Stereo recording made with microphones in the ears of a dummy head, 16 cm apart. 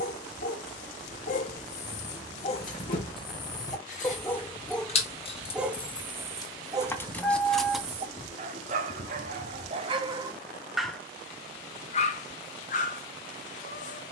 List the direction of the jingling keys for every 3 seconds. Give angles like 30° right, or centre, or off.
50° left, 40° left, centre, off, off.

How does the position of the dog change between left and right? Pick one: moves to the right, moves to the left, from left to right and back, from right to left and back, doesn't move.
from left to right and back.